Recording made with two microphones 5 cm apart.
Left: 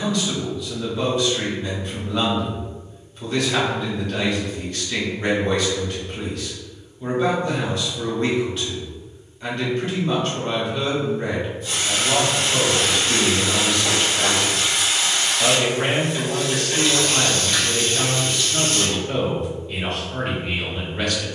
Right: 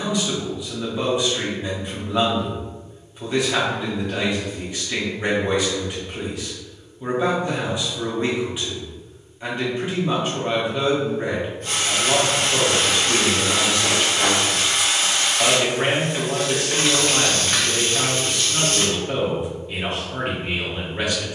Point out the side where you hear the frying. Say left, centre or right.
right.